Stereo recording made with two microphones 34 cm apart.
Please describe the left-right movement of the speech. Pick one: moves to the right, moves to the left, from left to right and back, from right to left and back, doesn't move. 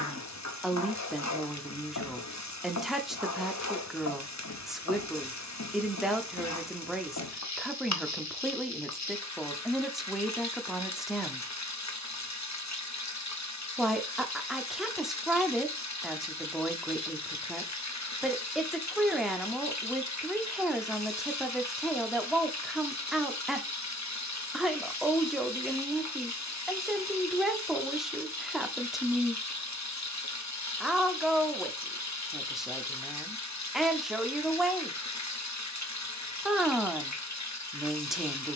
doesn't move.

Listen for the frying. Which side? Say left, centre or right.
left.